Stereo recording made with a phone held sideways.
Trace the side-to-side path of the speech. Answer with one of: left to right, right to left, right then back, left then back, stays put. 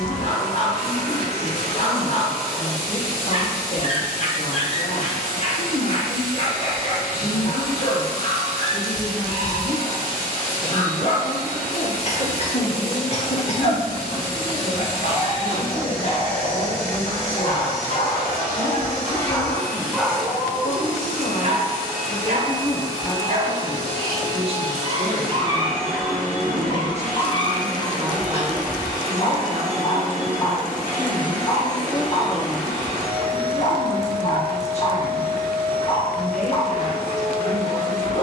right then back.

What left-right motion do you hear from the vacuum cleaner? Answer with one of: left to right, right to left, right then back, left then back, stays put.
stays put.